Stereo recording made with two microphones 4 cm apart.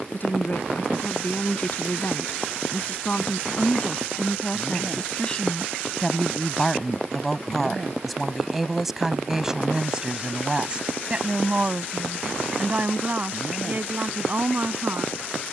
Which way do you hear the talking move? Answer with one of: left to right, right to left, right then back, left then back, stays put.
left to right.